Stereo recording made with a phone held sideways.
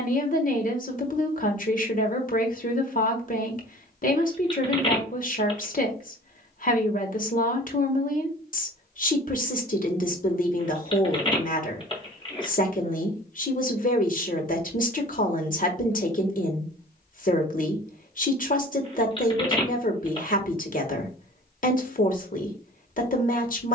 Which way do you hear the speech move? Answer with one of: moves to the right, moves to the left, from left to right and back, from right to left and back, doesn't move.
doesn't move.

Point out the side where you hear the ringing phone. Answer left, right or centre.
left.